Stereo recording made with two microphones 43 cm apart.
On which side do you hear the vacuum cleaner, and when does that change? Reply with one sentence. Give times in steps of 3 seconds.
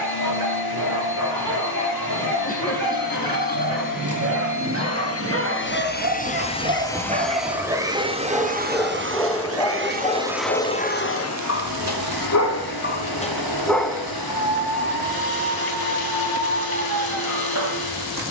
You can hear the vacuum cleaner on the left from 0 s, in the centre from 6 s and on the left from 12 s.